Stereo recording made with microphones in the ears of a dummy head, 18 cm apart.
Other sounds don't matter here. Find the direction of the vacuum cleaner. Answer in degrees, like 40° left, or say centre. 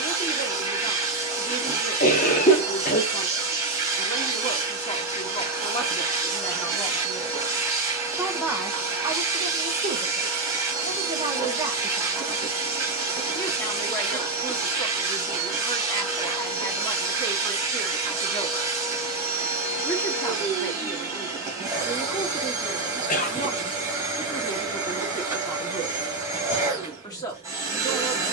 20° right.